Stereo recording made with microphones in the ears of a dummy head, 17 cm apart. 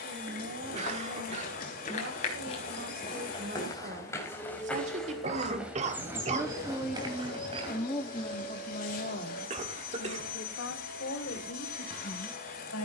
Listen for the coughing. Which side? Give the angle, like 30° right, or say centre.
40° right.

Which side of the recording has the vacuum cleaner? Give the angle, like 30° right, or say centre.
50° left.